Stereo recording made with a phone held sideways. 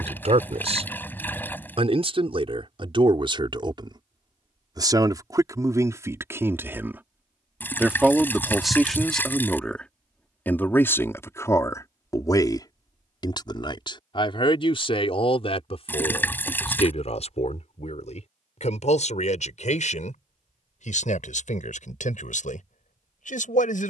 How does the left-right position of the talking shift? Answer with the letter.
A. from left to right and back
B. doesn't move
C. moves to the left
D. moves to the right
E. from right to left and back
C.